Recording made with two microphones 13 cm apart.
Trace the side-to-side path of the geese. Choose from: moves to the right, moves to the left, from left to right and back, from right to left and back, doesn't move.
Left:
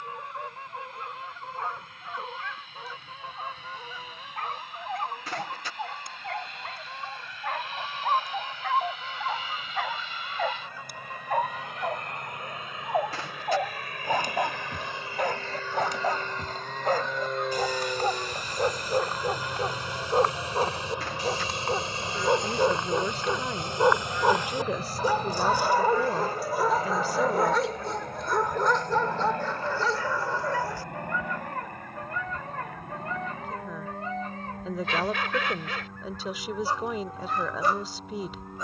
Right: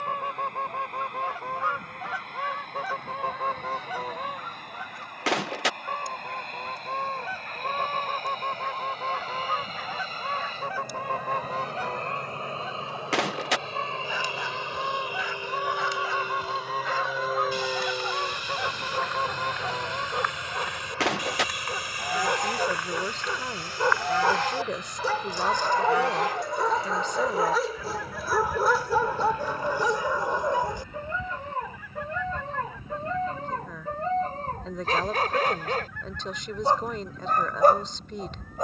doesn't move.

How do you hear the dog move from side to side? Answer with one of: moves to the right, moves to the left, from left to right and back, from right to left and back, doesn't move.
moves to the right.